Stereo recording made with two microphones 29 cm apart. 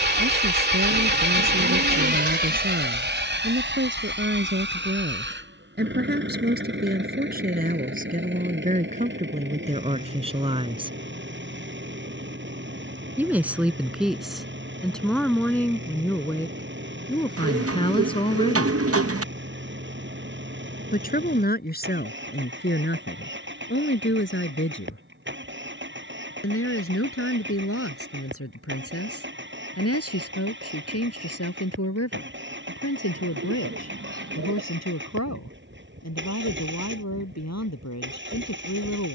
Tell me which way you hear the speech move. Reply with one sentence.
You can hear the speech move to the left.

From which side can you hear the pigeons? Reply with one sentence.
In this clip you hear the pigeons on the right.